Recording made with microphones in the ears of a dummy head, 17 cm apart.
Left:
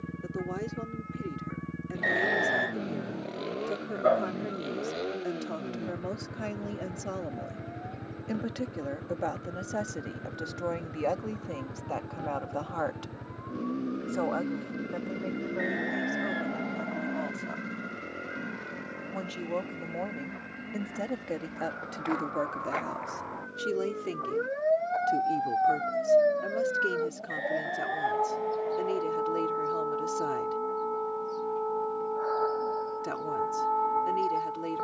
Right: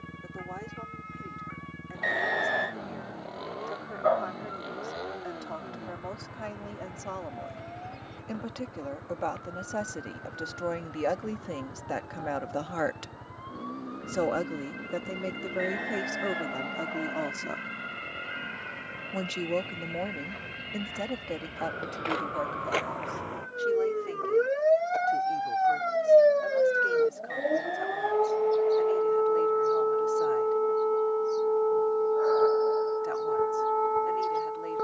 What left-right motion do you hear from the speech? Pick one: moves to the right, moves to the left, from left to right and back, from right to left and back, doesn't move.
from left to right and back.